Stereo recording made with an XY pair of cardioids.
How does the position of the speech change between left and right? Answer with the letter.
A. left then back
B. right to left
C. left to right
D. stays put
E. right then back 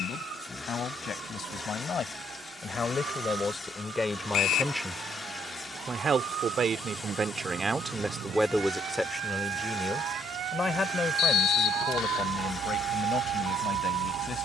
E.